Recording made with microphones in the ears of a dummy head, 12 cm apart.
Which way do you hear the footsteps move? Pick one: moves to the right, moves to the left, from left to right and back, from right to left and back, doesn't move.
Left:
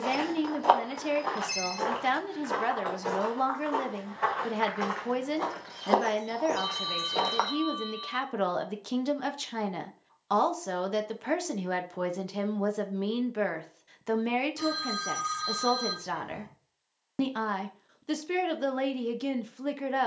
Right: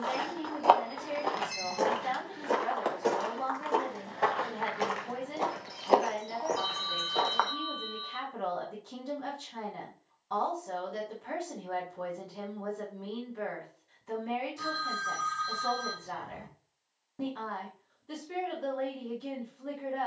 from left to right and back.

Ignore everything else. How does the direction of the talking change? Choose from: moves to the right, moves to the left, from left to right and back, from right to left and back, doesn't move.
doesn't move.